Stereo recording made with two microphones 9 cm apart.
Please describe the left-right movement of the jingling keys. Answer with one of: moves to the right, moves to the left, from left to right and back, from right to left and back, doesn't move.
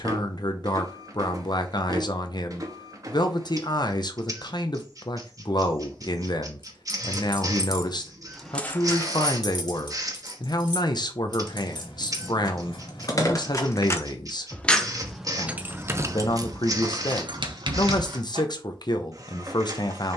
from right to left and back.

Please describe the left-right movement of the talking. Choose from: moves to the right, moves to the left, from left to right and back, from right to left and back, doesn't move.
doesn't move.